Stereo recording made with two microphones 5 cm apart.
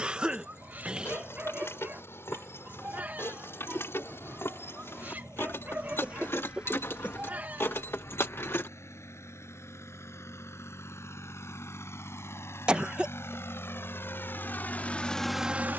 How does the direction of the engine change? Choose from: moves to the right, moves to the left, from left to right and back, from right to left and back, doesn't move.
moves to the right.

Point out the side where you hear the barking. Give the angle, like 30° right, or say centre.
40° right.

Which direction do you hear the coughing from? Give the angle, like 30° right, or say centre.
20° right.